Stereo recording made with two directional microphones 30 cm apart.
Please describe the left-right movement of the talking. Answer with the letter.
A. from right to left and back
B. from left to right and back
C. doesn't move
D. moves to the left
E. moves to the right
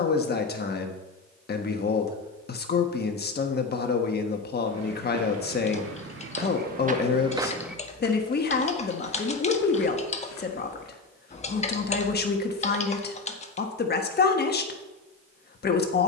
C.